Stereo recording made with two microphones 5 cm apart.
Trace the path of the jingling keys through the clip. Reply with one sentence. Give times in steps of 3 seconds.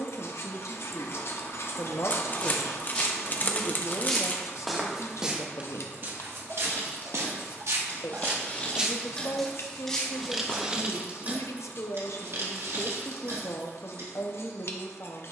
In this clip you hear the jingling keys not at all from 0 s, on the left from 6 s, in the centre from 9 s and on the right from 12 s.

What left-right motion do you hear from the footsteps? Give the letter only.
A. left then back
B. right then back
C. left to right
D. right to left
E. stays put
B.